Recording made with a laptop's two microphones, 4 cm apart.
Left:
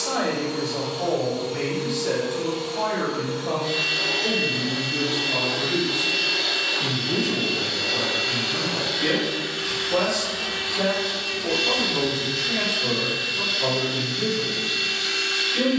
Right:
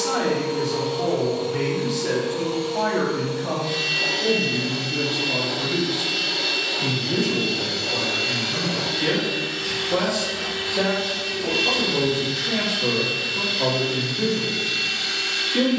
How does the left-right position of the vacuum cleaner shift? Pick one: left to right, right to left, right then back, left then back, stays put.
left then back.